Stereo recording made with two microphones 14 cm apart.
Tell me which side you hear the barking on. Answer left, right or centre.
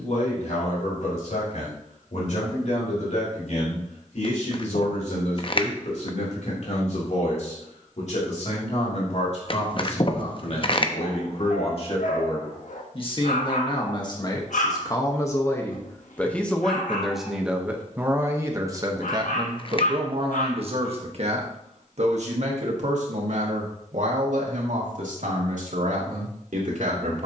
left.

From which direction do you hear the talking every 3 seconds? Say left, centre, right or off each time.
left, left, left, left, left, centre, right, right, right.